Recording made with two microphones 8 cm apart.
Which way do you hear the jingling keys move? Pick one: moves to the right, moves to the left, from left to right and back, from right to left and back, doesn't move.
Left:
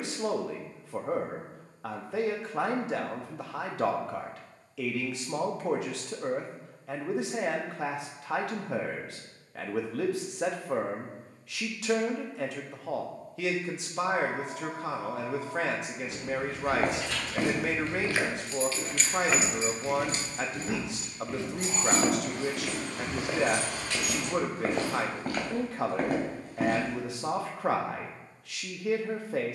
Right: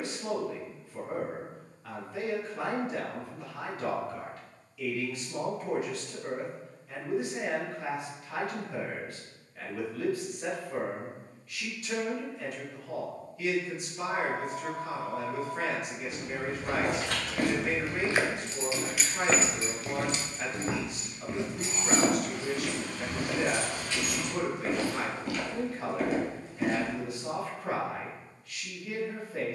moves to the left.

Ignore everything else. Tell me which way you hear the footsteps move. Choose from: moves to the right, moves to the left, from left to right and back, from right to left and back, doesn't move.
from left to right and back.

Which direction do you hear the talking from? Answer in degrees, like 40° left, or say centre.
80° left.